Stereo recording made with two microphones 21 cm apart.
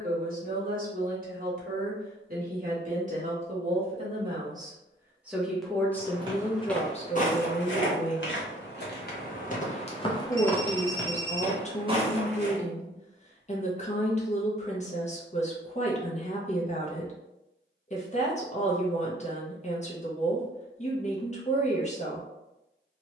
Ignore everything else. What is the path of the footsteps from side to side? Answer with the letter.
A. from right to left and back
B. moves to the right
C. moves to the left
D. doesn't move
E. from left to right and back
A.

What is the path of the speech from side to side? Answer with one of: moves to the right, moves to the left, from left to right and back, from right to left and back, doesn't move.
moves to the left.